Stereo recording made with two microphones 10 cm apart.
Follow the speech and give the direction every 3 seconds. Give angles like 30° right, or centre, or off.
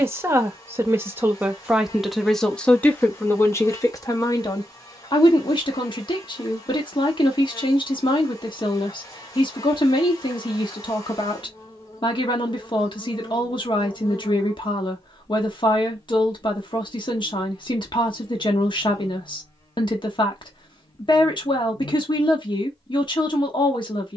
10° right, 40° left, 50° left, 50° left, 50° left, 50° left, 50° left, 50° left.